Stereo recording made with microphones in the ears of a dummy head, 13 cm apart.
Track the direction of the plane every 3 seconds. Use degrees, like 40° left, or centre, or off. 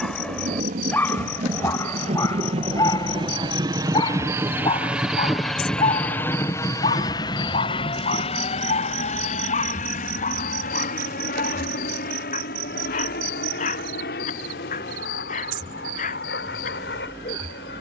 50° right, 10° right, 30° left, 50° left, 60° left, 70° left.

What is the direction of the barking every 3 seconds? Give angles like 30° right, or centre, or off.
20° left, 30° left, 40° left, 50° left, 50° left, 50° left.